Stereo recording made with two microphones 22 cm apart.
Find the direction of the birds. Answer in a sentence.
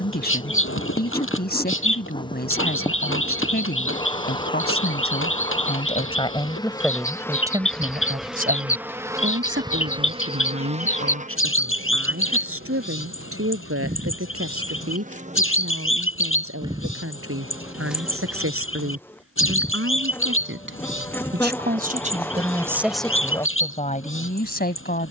You can hear the birds on the left.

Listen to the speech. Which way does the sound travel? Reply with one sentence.
You can hear the speech move from left to right and back again.